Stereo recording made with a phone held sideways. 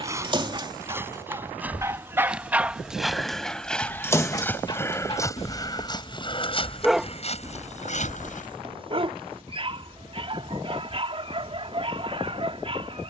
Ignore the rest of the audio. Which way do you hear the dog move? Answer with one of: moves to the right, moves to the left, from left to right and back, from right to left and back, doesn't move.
from right to left and back.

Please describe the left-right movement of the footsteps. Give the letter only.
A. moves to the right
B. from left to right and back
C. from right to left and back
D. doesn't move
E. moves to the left
E.